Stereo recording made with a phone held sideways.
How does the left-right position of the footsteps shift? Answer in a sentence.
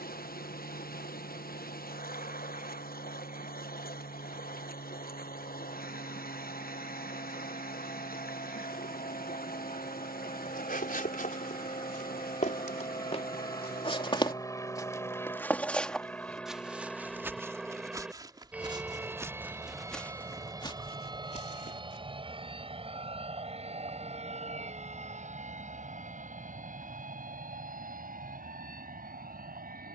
In this clip you hear the footsteps move from left to right and back again.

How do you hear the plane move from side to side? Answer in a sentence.
You can hear the plane travel towards the right.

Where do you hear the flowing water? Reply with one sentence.
You can hear the flowing water on the left.